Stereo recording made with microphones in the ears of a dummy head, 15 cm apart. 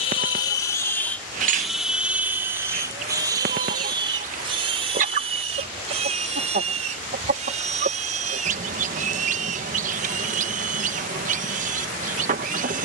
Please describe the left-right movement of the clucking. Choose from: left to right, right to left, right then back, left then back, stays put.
stays put.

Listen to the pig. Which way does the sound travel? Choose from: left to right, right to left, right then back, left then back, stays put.
left to right.